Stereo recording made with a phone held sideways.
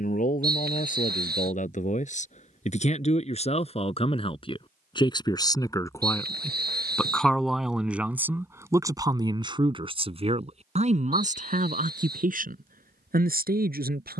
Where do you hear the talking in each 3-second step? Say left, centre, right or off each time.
left, left, centre, right, right.